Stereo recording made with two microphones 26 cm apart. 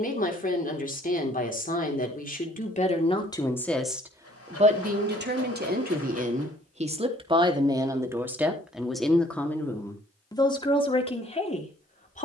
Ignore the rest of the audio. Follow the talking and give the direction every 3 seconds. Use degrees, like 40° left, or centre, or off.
30° left, 20° right, 20° right, 20° left.